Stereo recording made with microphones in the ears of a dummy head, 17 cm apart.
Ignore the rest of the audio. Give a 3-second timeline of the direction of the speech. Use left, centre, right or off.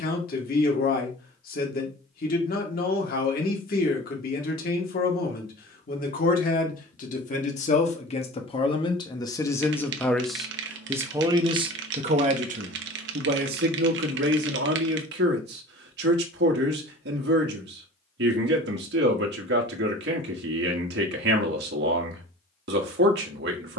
left, left, left, centre, right, right, right, right.